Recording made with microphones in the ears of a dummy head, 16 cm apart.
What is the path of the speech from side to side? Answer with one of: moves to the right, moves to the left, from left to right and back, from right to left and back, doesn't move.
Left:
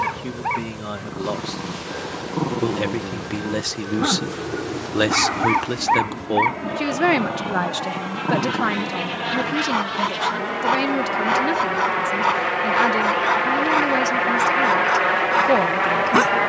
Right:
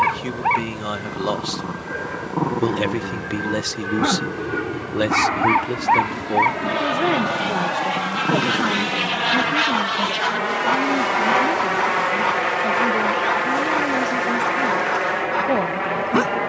moves to the left.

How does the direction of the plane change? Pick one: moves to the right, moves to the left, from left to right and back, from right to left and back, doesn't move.
moves to the left.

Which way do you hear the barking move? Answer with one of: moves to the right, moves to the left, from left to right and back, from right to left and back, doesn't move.
moves to the left.